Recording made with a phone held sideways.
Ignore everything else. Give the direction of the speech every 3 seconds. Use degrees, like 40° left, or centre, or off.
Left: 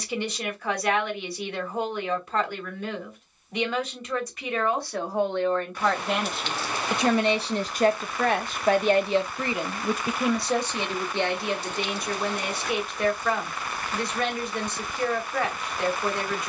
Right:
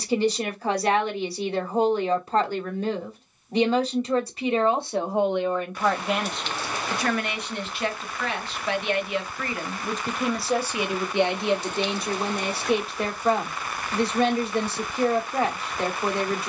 30° right, 20° right, 30° left, centre, 30° right, 30° right.